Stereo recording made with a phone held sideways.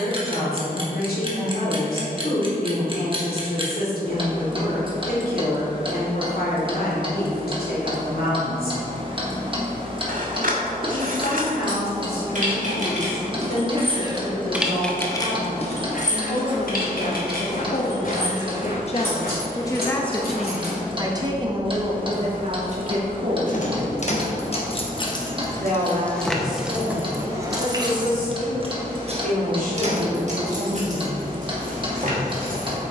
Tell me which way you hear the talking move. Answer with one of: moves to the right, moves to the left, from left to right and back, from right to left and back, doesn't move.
moves to the right.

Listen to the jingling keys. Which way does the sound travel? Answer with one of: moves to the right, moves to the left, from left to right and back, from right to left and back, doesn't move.
from right to left and back.